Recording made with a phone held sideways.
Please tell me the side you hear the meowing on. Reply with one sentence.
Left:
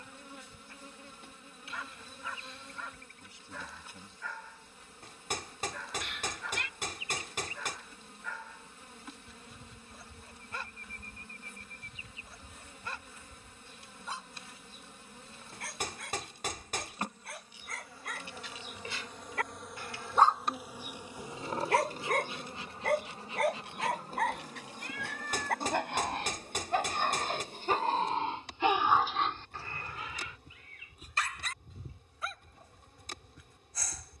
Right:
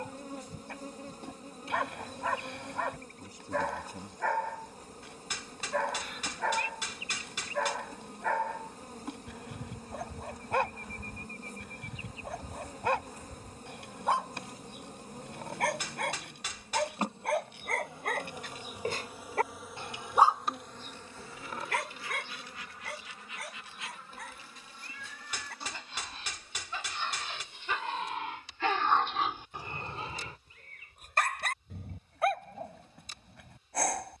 In this clip you hear the meowing on the left.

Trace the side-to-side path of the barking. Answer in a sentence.
You can hear the barking go left and come back.